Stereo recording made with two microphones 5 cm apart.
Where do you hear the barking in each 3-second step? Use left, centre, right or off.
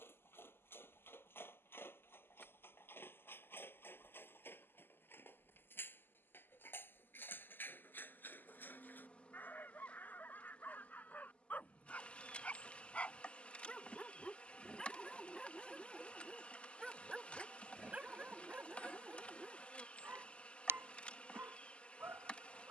left, left, left, left, left, centre, right, right.